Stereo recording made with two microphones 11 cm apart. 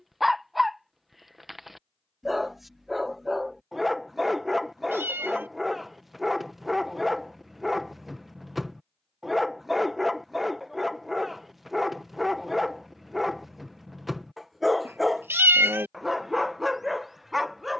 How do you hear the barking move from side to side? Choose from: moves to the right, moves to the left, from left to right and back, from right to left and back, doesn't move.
doesn't move.